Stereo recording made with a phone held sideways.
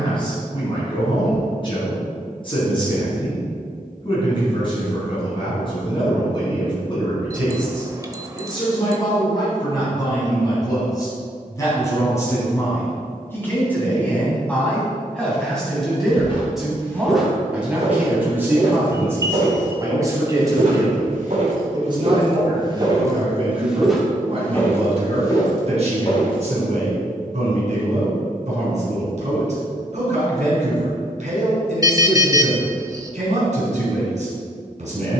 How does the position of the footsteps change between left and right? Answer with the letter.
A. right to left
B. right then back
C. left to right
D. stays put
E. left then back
B.